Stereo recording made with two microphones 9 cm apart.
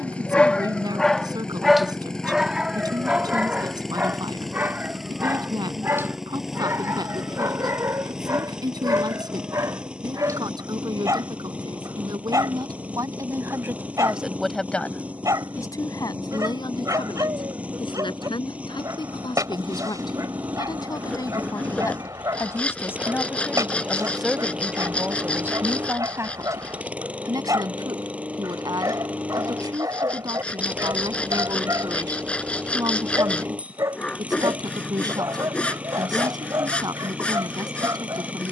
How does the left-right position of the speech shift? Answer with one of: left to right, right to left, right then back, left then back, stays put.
left then back.